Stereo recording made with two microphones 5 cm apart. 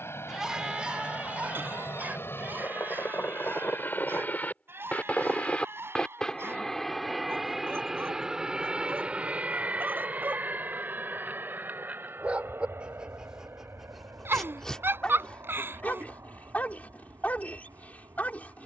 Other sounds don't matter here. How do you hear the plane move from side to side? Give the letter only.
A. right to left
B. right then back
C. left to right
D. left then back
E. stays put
C.